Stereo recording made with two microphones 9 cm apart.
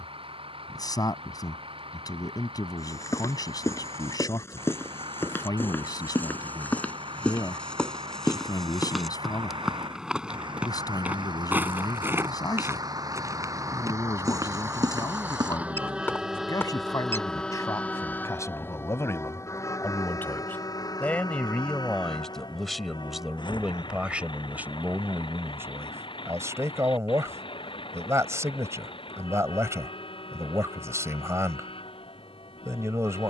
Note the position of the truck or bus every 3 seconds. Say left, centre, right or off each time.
right, right, right, right, right, centre, left, left, left, left, left.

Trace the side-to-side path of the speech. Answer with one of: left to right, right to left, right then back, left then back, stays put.
left to right.